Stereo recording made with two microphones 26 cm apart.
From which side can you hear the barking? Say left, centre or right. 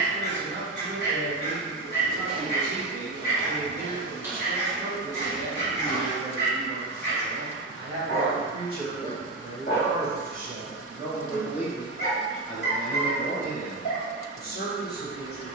left.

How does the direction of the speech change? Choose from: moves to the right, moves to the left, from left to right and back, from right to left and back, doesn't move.
moves to the left.